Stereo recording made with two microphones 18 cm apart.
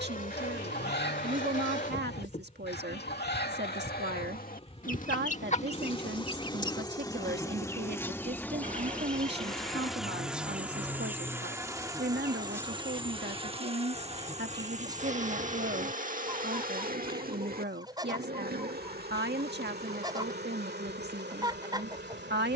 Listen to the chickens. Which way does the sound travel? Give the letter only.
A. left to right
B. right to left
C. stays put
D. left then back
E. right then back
A.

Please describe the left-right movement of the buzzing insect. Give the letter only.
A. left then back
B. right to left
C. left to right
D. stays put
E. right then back
C.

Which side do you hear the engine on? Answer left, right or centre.
right.